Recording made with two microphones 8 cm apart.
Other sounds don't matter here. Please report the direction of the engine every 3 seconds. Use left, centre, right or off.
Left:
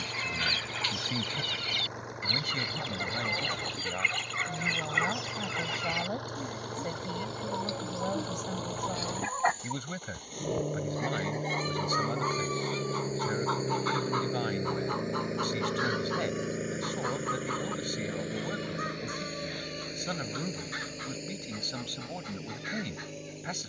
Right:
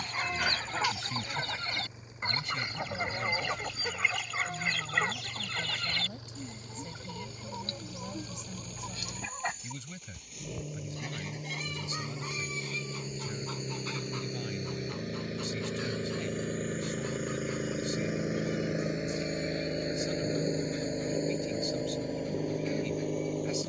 left, left, left, left, left, centre, right, right.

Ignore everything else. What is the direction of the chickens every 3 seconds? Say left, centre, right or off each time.
right, centre, left, left, left, left, left, left.